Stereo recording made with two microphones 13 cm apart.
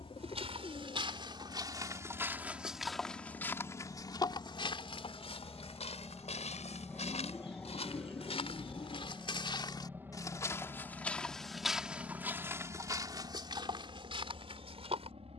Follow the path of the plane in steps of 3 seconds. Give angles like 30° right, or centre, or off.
50° left, 30° left, 10° left, 20° right, 40° right.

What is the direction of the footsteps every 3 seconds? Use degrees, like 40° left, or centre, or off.
30° right, 40° left, 60° left, 20° left, 30° right.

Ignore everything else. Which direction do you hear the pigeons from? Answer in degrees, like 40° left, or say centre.
40° left.